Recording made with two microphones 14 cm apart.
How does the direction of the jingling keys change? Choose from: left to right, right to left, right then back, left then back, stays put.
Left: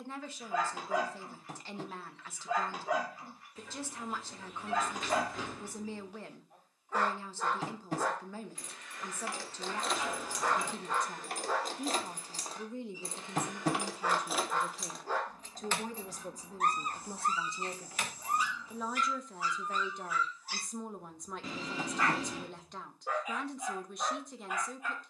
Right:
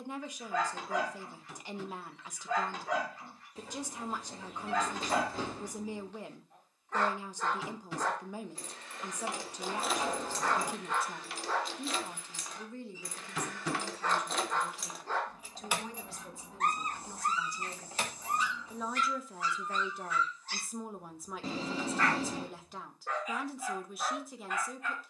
left then back.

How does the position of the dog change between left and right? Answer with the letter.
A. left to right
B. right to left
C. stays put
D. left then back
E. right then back
C.